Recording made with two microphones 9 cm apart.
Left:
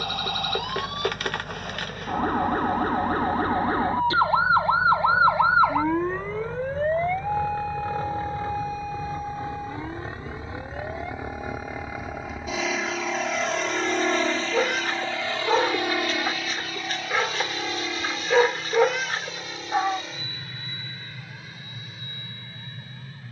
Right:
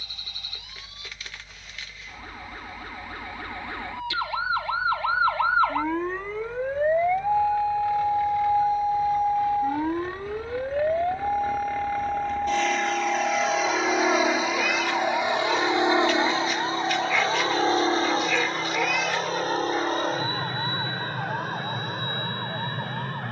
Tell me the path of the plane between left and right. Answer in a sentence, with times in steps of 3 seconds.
You can hear the plane on the left from 0 s, in the centre from 12 s and on the right from 15 s.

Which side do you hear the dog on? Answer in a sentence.
You can hear the dog on the left.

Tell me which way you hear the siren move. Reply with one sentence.
You can hear the siren move from left to right.